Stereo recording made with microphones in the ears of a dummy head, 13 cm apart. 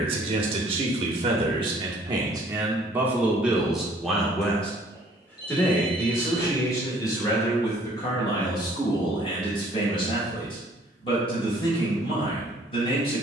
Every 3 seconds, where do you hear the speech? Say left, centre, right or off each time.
right, centre, left, left, left.